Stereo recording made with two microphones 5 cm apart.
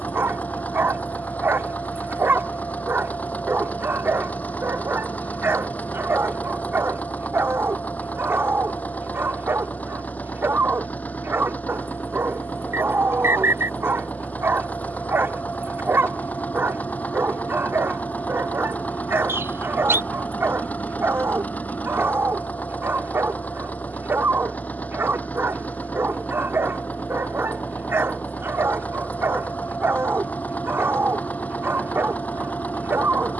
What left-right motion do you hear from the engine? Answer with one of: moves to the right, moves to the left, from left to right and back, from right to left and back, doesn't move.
doesn't move.